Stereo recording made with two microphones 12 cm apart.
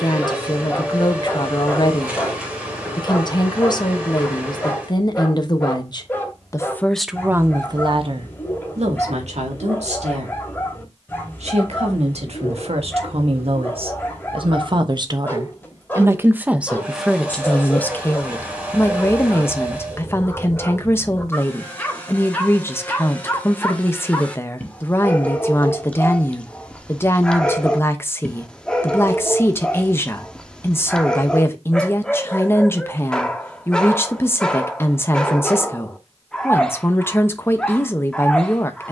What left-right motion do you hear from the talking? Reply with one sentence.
You can hear the talking go right and come back.